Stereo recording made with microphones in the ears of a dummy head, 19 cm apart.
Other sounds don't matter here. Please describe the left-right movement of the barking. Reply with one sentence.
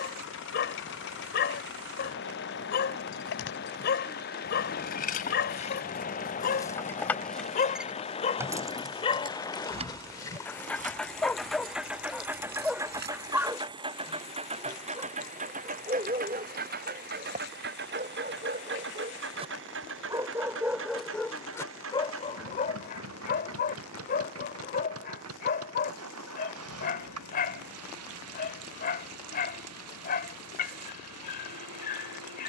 You can hear the barking move from left to right and back again.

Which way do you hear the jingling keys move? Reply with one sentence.
In this clip you hear the jingling keys move to the right.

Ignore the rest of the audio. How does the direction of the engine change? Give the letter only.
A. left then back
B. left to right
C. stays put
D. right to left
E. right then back
B.